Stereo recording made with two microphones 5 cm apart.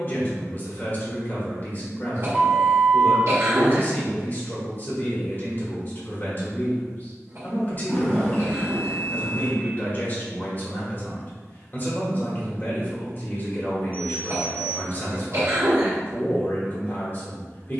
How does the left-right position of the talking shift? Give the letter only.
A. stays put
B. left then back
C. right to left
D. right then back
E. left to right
A.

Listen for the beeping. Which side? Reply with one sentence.
In this clip you hear the beeping on the left.